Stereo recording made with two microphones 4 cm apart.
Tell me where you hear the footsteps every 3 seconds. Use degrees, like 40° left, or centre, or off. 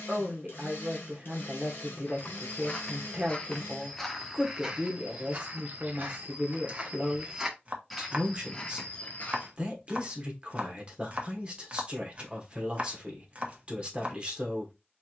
40° left, 10° right, 10° right, 40° left, off.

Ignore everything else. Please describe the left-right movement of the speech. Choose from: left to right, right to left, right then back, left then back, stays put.
stays put.